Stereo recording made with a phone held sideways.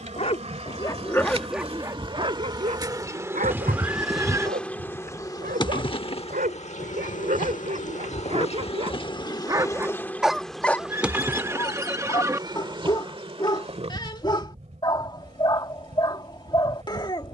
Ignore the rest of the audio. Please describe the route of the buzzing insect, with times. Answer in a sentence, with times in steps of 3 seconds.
You can hear the buzzing insect on the right from 0 s, in the centre from 3 s, on the left from 6 s, in the centre from 9 s and on the right from 12 s.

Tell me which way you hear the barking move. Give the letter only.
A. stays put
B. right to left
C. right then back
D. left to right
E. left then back
C.